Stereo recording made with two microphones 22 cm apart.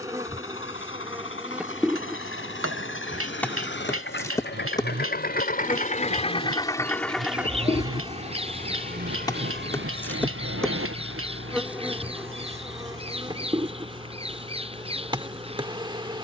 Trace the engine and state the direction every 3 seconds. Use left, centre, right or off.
left, left, centre, right, right, right.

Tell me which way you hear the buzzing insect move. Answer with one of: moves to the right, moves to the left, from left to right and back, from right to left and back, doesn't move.
from right to left and back.